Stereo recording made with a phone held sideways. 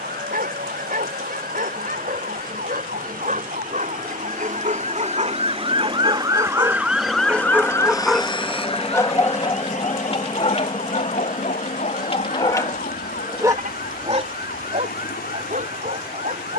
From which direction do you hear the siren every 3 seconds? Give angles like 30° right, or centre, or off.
70° right, 50° right, 10° left, 60° left, 70° left, 70° left.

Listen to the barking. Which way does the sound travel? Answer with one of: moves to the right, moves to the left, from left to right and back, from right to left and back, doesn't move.
from right to left and back.